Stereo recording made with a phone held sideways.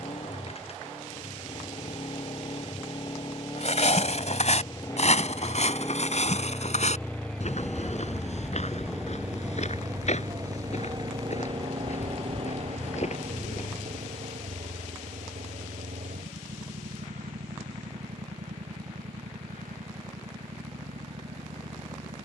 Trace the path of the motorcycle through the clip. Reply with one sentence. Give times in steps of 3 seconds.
You can hear the motorcycle on the left from 0 s, in the centre from 6 s and on the right from 9 s.